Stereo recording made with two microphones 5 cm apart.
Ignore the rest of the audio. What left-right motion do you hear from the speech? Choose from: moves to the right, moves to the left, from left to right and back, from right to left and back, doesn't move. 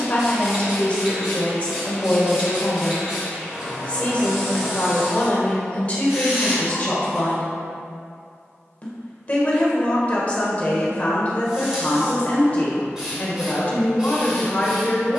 doesn't move.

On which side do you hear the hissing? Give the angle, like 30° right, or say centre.
10° right.